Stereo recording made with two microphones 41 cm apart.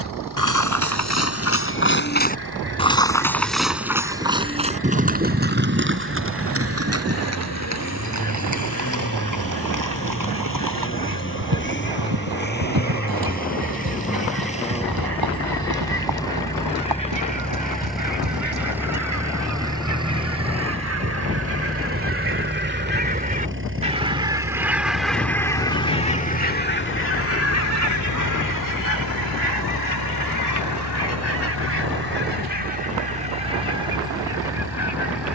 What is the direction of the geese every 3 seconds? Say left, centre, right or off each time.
right, right, right, right, right, right, right, right, centre, left, left, left.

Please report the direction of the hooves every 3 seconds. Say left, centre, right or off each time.
left, centre, right, right, right, right, right, off, off, off, off, off.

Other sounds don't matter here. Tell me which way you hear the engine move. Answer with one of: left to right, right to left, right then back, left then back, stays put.
left to right.